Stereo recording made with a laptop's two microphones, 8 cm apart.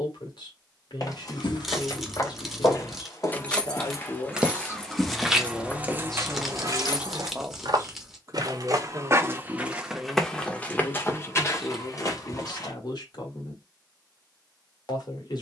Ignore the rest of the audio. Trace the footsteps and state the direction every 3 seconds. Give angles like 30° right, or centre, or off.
50° left, 10° left, 40° right, 10° left, 50° left.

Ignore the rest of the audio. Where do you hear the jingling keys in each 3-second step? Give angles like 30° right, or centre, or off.
60° left, 10° left, 50° left, off, off.